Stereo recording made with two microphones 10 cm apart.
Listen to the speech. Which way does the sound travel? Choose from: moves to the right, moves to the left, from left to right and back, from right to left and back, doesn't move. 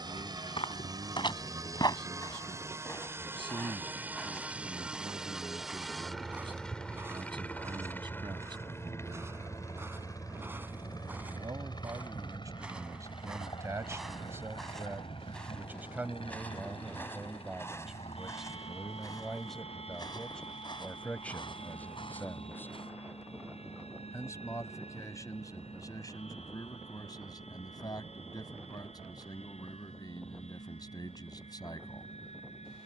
moves to the left.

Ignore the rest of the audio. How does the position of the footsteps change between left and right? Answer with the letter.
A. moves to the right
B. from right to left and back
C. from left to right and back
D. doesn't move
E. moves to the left
C.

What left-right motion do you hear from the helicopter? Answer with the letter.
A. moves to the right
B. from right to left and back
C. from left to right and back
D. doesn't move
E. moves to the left
E.